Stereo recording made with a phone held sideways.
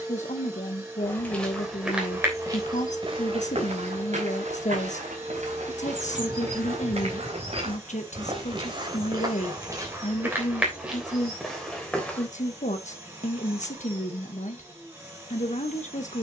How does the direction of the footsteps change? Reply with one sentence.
You can hear the footsteps go right and come back.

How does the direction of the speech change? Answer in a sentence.
In this clip you hear the speech stay in one place.